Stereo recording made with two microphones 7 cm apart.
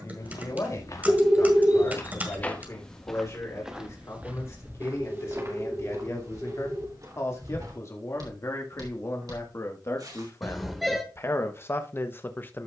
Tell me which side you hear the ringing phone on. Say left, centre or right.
centre.